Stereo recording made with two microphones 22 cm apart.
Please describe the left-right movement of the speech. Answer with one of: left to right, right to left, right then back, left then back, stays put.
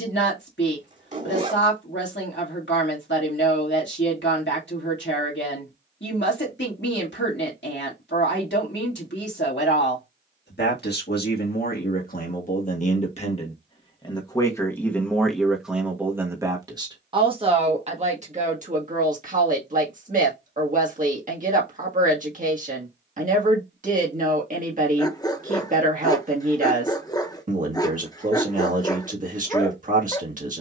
left to right.